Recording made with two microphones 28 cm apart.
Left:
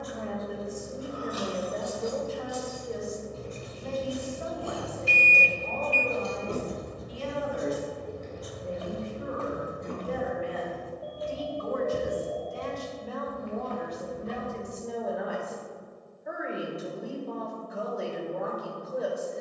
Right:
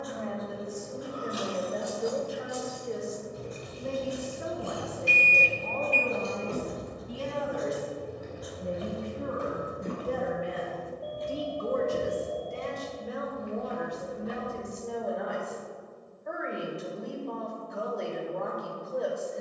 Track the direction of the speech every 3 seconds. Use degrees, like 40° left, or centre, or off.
centre, 50° right, 70° right, 50° right, 20° right, centre, centre.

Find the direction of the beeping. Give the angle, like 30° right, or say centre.
20° right.